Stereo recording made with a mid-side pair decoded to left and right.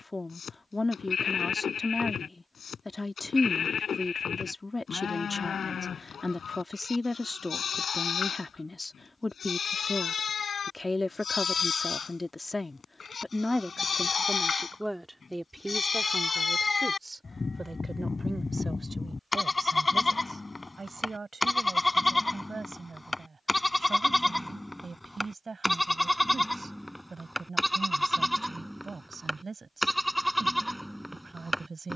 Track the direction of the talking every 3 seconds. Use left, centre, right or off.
left, left, left, left, centre, right, right, right, right, right, right.